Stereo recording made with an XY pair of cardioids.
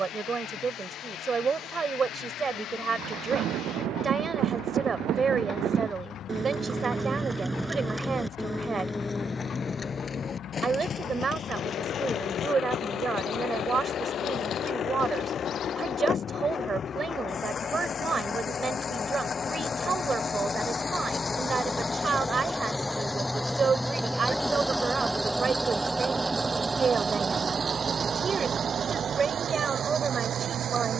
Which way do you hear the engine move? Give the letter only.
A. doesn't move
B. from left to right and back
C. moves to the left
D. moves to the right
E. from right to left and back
D.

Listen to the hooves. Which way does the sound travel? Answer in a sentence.
You can hear the hooves move to the left.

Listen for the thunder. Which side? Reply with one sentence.
In this clip you hear the thunder on the right.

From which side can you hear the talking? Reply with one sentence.
In this clip you hear the talking on the right.